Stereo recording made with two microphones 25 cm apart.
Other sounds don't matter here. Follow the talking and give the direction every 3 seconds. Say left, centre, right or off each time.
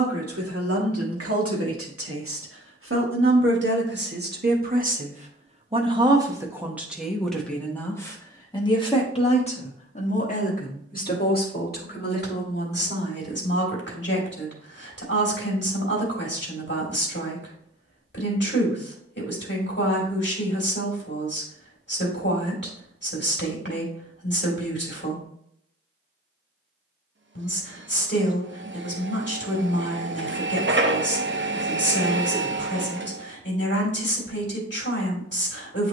right, right, centre, left, left, left, left, left, left, left, left, left.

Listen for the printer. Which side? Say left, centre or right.
right.